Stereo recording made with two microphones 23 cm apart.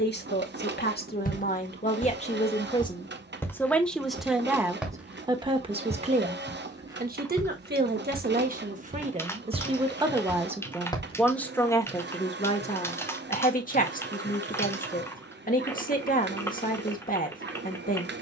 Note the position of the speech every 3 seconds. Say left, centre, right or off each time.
left, centre, right, centre, left, left.